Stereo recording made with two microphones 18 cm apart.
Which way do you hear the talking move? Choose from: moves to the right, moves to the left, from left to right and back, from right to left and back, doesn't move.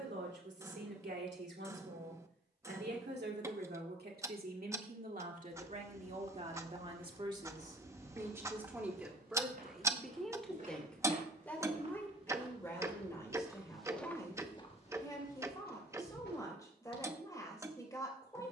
moves to the left.